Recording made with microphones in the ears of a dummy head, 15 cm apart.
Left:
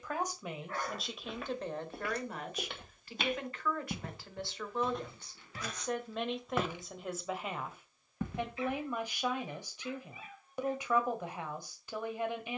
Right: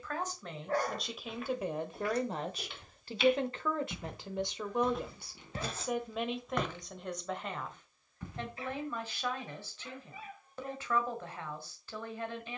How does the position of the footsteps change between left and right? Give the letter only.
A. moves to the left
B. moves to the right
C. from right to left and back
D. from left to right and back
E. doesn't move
D.